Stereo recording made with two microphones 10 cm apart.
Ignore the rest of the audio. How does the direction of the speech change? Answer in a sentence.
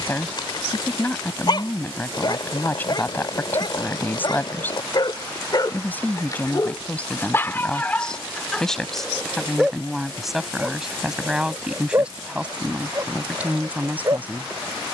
You can hear the speech travel towards the right.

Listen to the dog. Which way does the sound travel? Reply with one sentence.
You can hear the dog travel towards the right.